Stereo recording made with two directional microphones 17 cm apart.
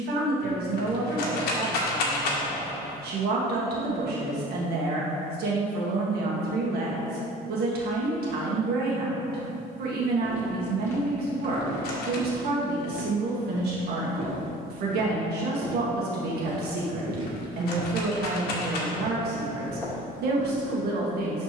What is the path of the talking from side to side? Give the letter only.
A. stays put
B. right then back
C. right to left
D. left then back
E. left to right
A.